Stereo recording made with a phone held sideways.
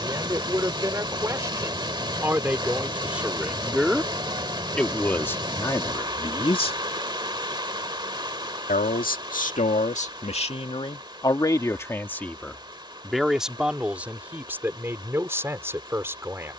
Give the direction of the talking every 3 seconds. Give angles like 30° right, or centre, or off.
20° right, 10° left, 40° left, 40° left, centre, 20° right.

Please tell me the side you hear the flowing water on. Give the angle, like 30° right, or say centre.
30° right.